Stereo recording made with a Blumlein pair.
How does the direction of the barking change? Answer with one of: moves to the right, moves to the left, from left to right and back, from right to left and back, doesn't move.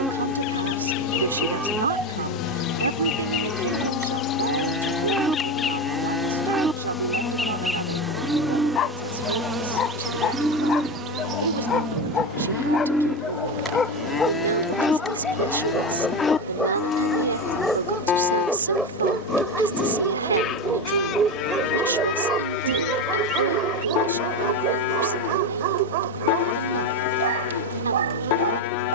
moves to the right.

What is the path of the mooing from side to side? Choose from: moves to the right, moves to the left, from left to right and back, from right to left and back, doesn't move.
moves to the left.